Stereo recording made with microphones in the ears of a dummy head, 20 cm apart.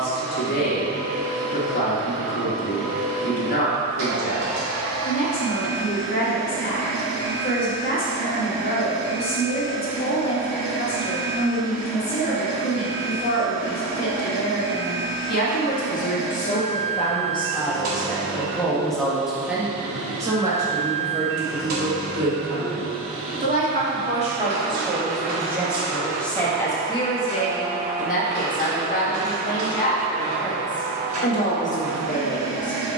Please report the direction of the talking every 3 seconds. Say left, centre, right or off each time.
left, left, left, left, left, left, centre, right, centre, left, left.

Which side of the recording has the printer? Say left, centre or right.
right.